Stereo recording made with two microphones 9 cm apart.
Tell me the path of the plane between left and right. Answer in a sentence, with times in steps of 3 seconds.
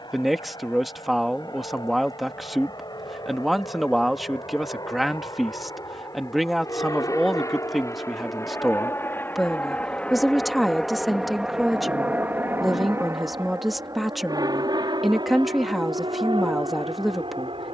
You can hear the plane on the left from 0 s, in the centre from 9 s and on the right from 12 s.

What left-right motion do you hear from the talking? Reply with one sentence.
In this clip you hear the talking stay in one place.